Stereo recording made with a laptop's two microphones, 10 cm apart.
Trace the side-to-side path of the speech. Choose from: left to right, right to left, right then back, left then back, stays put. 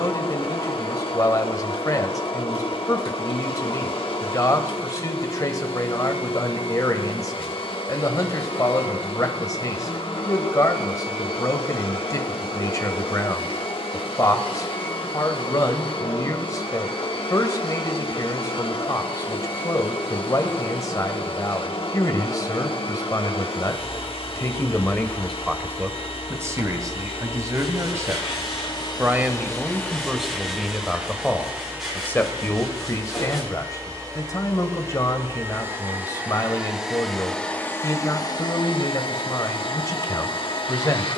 right then back.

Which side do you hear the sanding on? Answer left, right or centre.
centre.